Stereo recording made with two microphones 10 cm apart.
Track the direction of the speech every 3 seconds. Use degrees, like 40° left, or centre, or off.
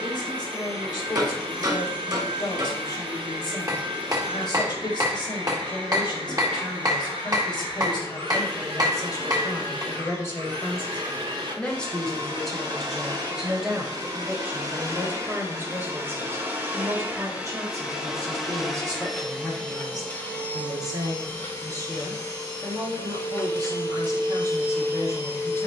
50° left, 50° left, 50° left, 20° left, 10° right, 30° right, 40° right, 40° right, 40° right.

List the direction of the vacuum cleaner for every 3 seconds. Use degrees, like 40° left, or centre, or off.
70° right, 70° right, 70° right, 60° right, 40° right, 20° right, 10° left, 30° left, 30° left.